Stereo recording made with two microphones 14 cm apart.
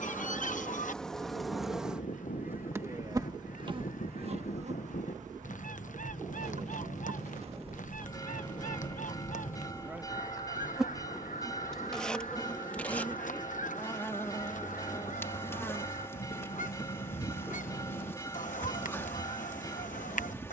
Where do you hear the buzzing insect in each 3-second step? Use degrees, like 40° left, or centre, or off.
centre, 50° right, 50° right, 10° right, 10° left, 20° left, 20° left.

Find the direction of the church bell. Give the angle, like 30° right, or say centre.
20° left.